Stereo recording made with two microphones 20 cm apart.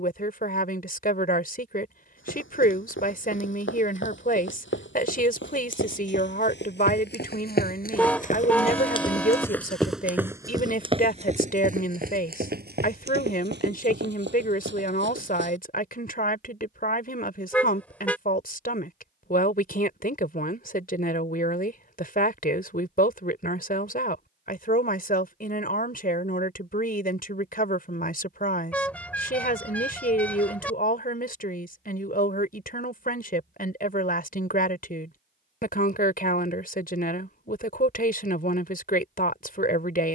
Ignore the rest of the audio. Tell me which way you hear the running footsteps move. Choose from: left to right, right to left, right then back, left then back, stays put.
left to right.